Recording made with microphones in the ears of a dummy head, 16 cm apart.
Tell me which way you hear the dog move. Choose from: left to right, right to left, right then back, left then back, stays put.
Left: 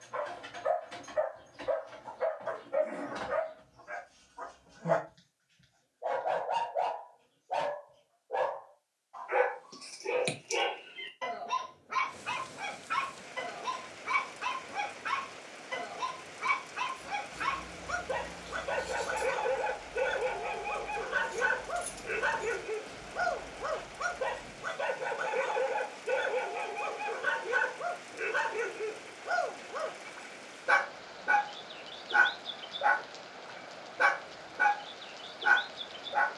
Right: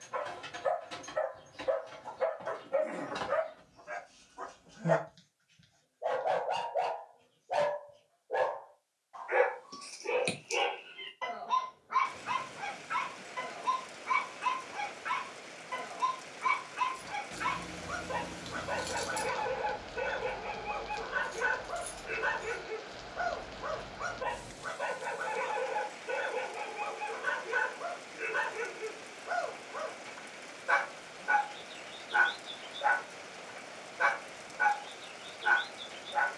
right to left.